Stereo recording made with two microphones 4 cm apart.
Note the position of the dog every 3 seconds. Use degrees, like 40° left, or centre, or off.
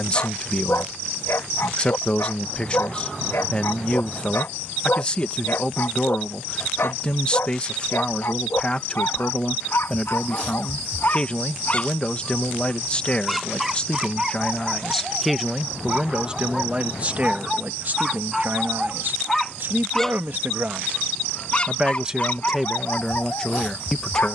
60° left, 60° left, 60° left, 50° left, 10° right, 20° right, centre, 40° left.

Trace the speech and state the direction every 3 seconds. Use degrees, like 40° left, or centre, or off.
20° left, 20° left, 20° left, 20° left, 20° left, 20° right, 50° right, centre.